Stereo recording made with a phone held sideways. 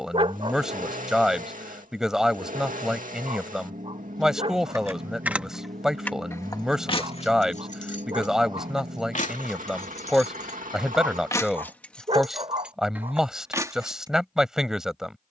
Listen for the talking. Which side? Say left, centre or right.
centre.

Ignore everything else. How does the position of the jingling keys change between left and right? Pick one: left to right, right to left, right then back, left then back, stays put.
left then back.